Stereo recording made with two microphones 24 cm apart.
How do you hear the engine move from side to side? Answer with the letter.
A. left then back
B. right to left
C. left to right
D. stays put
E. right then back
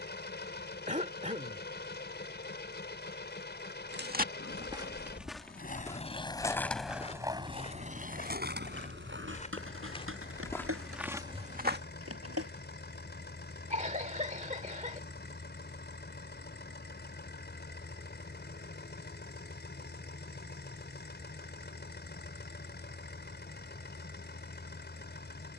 D.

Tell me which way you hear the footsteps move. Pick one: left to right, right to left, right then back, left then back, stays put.
left then back.